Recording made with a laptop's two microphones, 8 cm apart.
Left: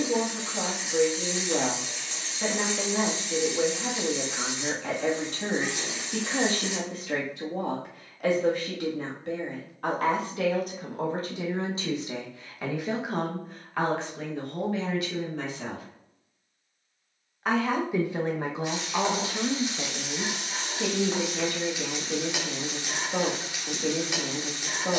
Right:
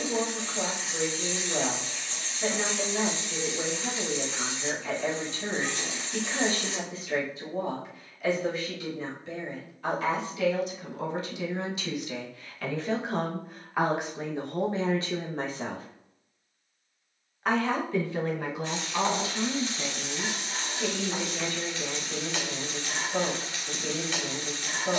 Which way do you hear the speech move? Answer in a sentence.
You can hear the speech move from left to right and back again.